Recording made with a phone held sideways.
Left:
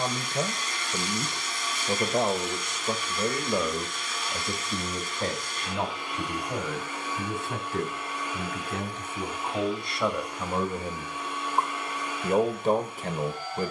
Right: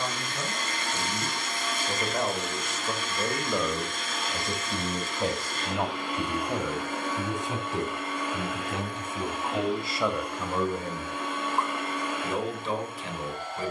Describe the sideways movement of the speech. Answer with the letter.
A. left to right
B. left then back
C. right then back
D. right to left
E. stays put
C.